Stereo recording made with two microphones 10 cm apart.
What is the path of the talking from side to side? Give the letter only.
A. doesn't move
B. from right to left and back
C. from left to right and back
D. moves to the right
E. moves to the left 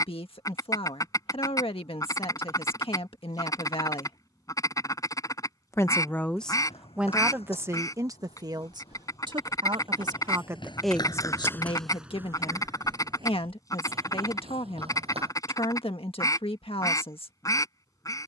C.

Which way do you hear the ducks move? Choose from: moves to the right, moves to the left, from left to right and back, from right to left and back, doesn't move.
doesn't move.